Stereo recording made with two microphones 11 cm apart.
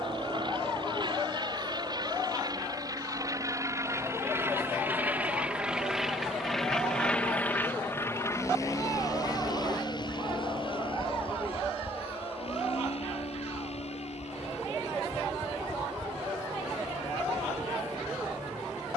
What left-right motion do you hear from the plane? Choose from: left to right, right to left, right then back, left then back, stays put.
right to left.